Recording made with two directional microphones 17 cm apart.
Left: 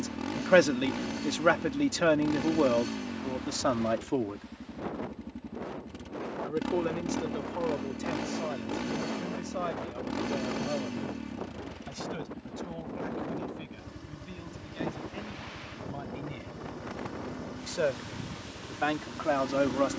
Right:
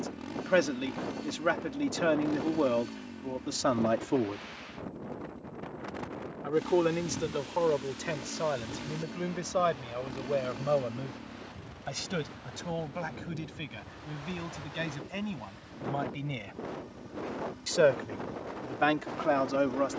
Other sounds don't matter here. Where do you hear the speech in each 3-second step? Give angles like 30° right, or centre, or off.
20° left, centre, 30° right, 40° right, 50° right, 50° right, 10° right.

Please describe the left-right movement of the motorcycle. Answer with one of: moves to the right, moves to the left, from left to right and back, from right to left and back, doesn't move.
doesn't move.